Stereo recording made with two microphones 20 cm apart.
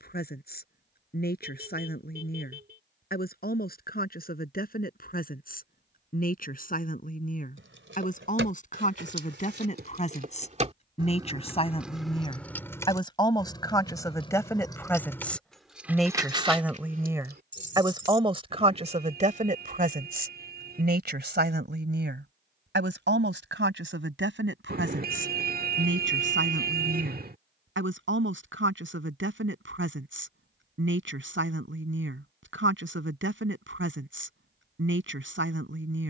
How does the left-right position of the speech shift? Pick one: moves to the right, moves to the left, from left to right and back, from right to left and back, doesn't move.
moves to the right.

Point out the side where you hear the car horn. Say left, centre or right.
right.